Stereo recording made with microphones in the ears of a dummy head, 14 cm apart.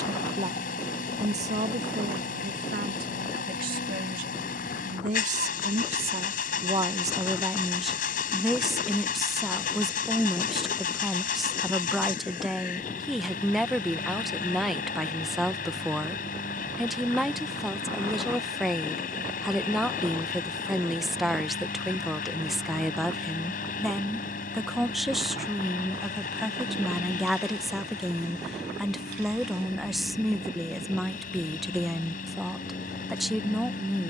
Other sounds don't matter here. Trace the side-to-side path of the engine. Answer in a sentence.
You can hear the engine stay in one place.